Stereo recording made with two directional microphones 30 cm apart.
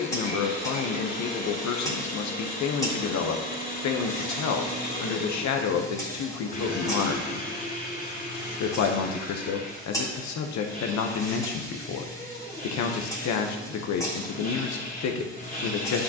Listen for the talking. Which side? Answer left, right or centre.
left.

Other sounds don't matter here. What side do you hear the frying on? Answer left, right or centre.
centre.